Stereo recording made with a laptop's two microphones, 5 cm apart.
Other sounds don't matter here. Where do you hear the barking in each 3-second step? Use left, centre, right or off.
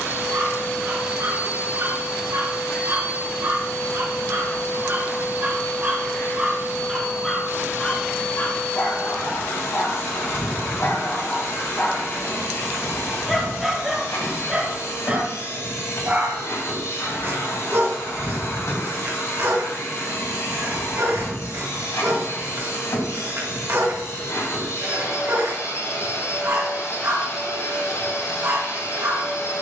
right, right, centre, left, centre, right, right, right, right, right.